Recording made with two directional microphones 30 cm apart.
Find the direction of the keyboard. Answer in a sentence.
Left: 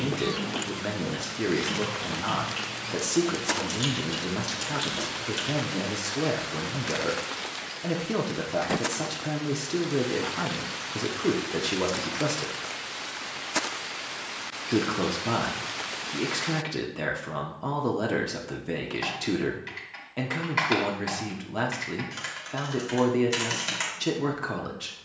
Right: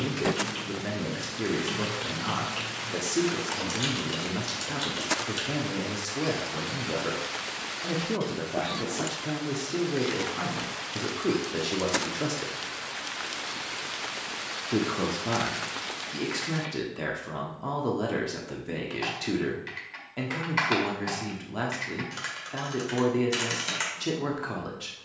You can hear the keyboard in the centre.